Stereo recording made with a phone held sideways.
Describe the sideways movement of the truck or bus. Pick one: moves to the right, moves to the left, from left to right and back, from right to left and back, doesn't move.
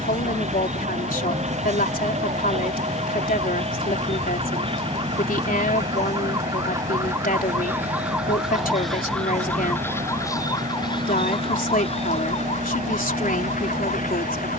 doesn't move.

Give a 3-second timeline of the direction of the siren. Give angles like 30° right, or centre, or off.
50° right, 40° right, 10° right, 20° left, 60° left.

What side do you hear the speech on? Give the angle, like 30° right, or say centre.
70° left.